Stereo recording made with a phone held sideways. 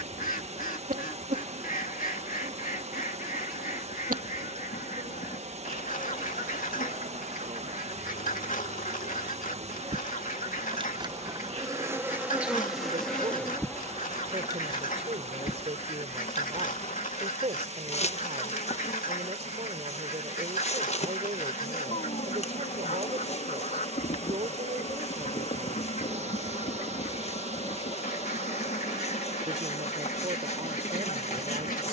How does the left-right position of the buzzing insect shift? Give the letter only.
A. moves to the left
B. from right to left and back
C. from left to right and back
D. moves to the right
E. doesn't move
A.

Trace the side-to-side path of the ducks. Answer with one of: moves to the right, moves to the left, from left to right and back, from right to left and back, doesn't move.
doesn't move.